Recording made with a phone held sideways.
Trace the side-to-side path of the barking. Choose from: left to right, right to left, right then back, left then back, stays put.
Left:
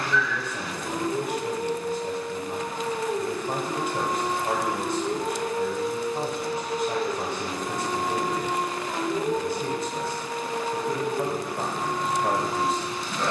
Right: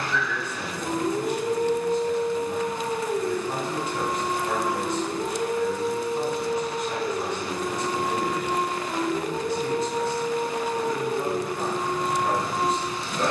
left then back.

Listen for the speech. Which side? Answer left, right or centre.
left.